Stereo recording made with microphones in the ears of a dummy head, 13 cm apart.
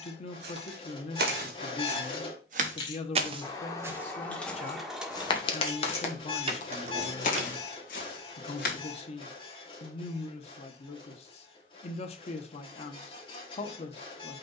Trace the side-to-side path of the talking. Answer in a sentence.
In this clip you hear the talking stay put.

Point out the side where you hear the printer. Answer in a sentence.
In this clip you hear the printer on the left.